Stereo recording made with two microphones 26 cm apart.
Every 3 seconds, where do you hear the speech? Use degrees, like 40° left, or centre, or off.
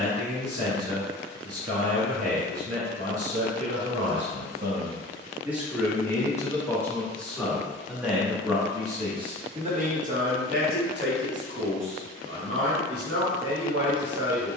70° right, 40° right, centre, 40° right, 60° right.